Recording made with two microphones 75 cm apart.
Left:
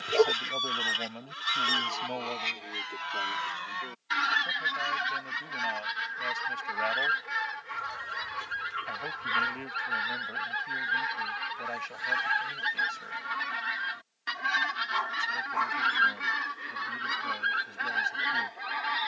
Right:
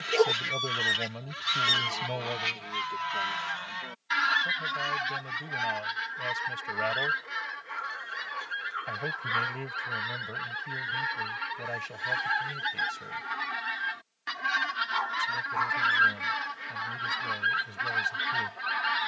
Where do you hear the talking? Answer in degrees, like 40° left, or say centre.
60° right.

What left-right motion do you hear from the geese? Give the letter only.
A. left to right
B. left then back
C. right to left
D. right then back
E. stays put
B.